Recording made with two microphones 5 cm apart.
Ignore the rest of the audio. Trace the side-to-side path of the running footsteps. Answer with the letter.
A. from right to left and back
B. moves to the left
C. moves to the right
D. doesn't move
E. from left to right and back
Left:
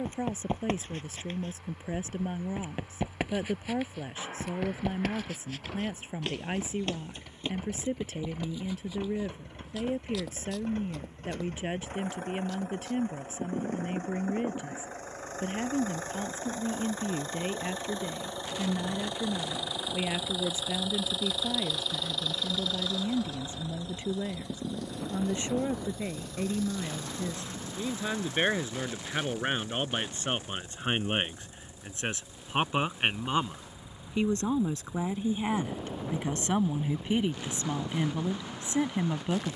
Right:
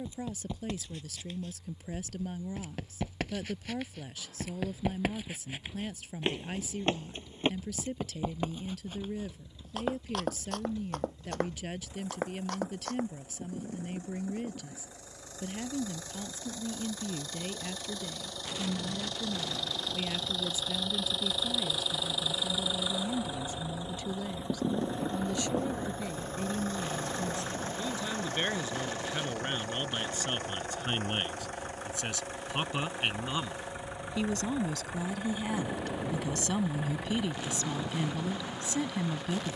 C.